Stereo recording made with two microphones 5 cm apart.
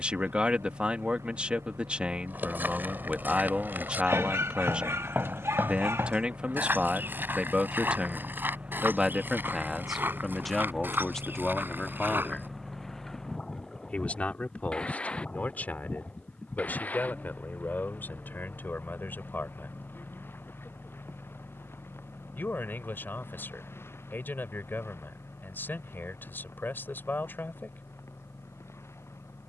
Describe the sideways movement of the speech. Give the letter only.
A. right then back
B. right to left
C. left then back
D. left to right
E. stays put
B.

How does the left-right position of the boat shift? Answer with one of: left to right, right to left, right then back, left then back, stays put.
right to left.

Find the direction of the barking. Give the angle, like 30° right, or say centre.
60° right.